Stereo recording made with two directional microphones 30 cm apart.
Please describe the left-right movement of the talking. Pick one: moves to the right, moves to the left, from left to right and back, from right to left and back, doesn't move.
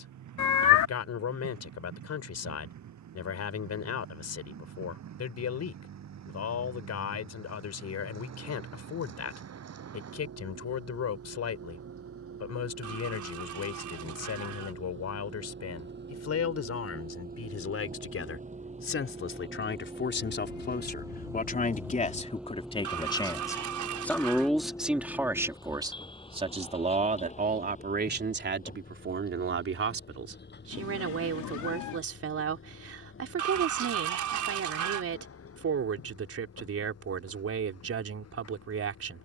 moves to the right.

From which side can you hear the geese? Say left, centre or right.
right.